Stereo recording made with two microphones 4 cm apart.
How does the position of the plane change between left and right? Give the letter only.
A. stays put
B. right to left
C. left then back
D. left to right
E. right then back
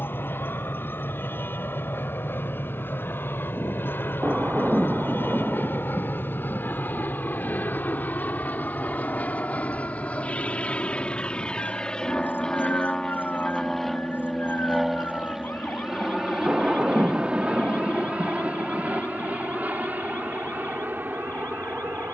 D.